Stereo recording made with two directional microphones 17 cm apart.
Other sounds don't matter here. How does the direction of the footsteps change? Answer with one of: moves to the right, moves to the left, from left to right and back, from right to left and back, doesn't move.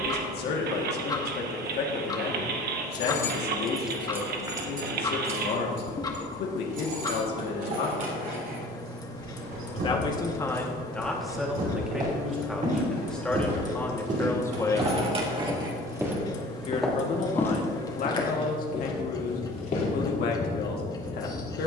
moves to the left.